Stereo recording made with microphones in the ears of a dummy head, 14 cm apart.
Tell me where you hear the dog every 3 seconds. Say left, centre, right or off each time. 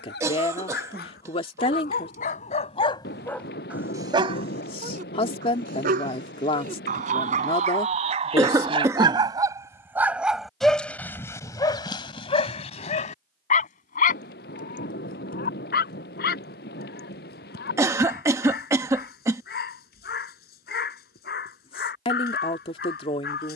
left, right, right, centre, left, left, left, left.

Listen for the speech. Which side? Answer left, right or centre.
left.